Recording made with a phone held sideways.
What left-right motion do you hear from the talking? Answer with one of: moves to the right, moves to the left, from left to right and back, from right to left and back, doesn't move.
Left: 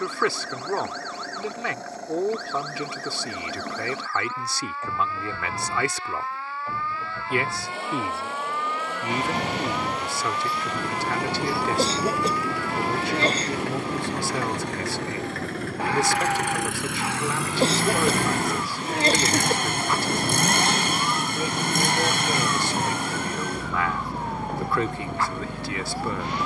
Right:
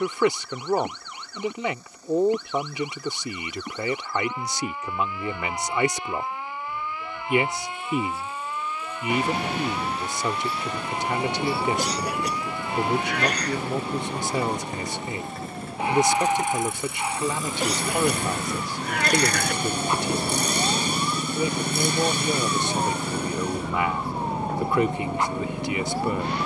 doesn't move.